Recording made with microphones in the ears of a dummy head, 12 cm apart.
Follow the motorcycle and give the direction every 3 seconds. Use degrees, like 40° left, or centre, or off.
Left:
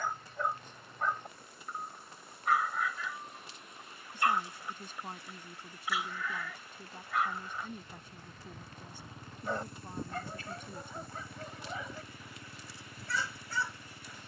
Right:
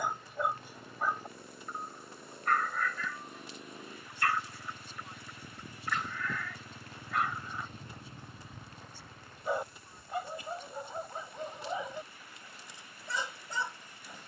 80° right, 70° right, 30° right, 50° left, 70° left.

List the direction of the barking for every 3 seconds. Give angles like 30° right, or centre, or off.
centre, 10° left, centre, 10° right, 20° right.